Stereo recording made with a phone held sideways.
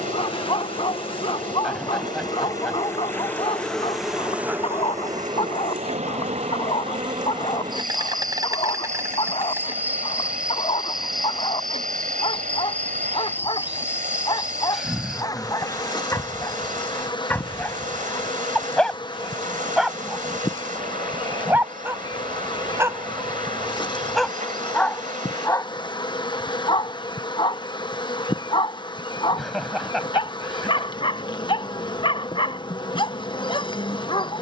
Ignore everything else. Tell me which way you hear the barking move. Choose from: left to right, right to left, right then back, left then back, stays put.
right then back.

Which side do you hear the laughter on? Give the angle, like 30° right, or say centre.
centre.